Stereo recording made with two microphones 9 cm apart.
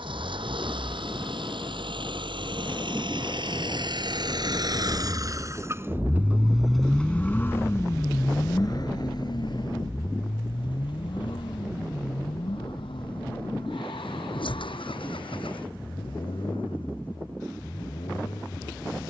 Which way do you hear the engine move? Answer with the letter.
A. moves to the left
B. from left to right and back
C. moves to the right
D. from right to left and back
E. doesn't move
A.